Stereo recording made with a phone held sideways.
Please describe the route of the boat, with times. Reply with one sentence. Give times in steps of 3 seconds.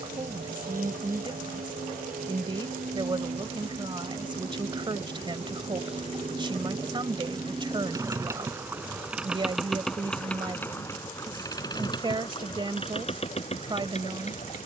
In this clip you hear the boat on the right from 0 s, in the centre from 9 s and on the left from 12 s.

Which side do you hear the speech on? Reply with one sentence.
In this clip you hear the speech on the right.